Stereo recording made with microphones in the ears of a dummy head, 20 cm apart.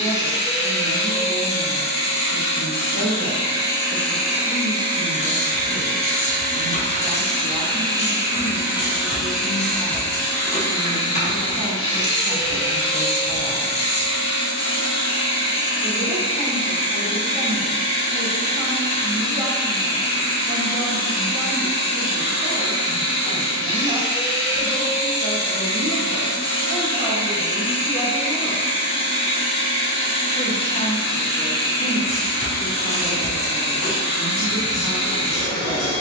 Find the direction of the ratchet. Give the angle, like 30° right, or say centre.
30° left.